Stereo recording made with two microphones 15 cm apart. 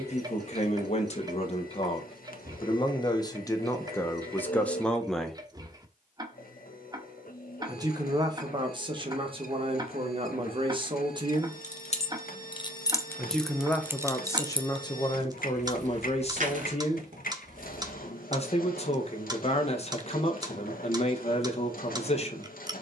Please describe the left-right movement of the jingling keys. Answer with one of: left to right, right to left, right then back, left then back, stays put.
left to right.